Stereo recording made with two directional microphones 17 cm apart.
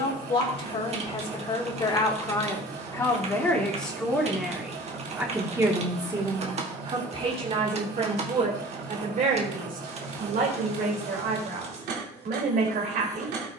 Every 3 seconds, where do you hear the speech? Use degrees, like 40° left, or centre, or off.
30° left, centre, 40° right, 60° right, 60° right.